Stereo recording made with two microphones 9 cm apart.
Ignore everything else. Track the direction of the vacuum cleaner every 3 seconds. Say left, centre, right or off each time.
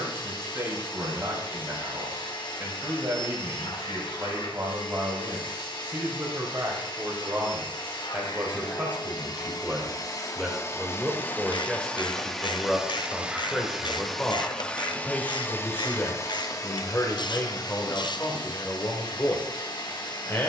left, left, left, left, centre, left, left.